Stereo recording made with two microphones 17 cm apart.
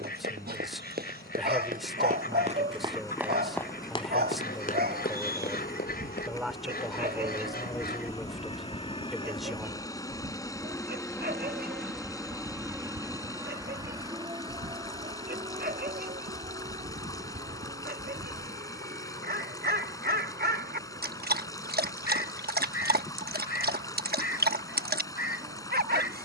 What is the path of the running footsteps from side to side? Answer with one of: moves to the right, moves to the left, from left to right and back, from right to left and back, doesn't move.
moves to the left.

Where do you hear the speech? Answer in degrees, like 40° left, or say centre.
centre.